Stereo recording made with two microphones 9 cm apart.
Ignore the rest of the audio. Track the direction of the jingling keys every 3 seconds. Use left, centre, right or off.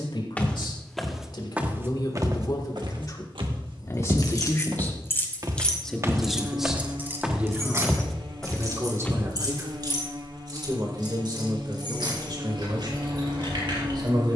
off, left, right, right, right.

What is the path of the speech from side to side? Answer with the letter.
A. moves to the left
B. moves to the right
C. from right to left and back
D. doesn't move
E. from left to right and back
B.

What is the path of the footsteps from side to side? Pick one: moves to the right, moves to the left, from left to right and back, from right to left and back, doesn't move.
from left to right and back.